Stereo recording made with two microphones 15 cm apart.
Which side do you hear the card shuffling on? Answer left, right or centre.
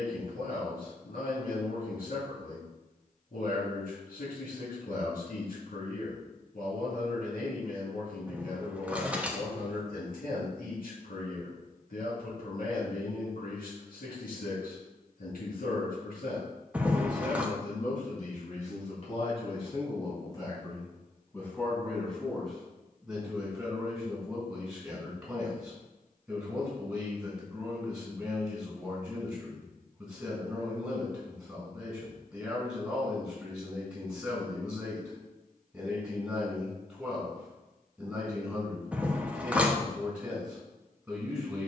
centre.